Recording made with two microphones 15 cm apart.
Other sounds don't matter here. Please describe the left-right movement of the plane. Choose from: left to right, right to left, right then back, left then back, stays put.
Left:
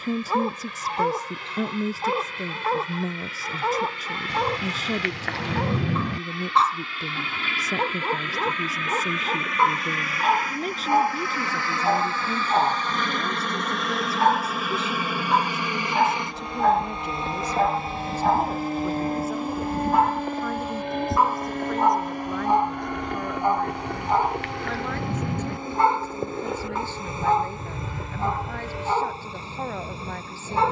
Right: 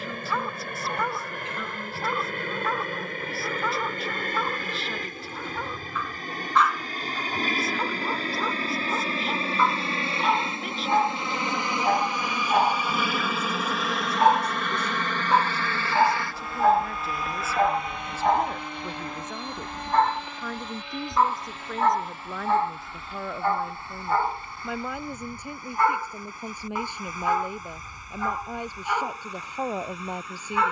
right to left.